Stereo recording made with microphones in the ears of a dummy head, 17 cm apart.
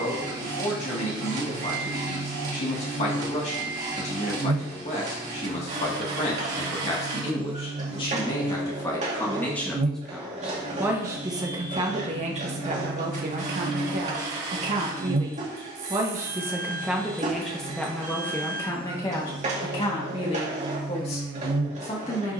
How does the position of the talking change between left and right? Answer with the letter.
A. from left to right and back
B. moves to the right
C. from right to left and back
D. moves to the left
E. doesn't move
A.